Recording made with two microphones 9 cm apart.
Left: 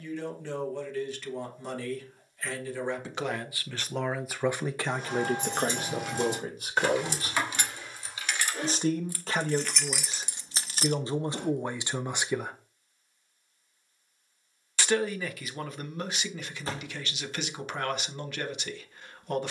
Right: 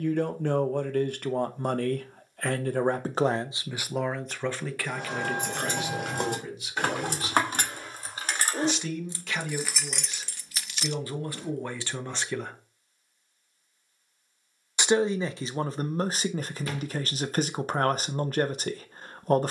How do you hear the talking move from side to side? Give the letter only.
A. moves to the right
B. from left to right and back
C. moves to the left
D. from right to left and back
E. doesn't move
D.